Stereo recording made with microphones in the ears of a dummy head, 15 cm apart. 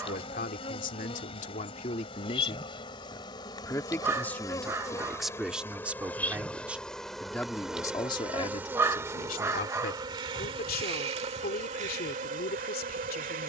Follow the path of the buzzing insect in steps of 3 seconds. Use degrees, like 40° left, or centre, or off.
30° left, 20° left, centre, 30° right, 50° right.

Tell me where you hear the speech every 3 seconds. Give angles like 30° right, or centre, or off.
50° left, 10° left, 20° left, 60° left, 60° left.